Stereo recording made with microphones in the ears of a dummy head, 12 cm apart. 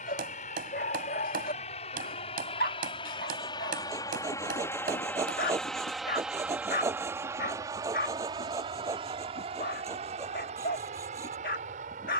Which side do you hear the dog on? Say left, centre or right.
left.